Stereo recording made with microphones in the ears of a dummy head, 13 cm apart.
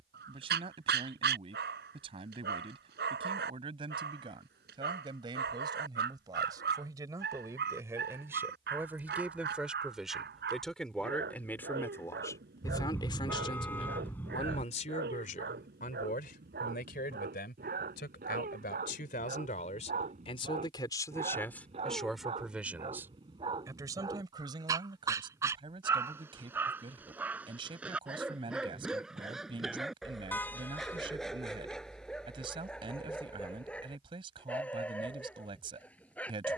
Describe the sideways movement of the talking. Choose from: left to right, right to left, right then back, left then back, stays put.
left then back.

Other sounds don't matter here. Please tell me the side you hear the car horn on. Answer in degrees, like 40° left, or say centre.
10° left.